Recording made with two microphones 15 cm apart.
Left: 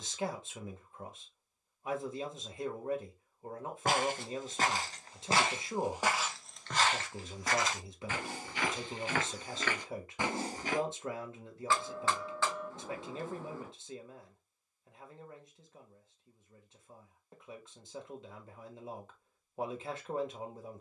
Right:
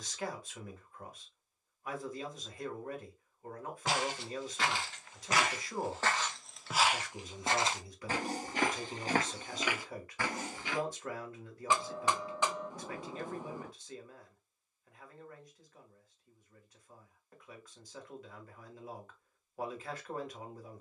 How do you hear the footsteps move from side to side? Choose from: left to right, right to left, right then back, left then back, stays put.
right then back.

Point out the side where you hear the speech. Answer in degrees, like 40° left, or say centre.
20° left.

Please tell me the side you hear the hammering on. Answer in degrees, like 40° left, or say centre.
20° right.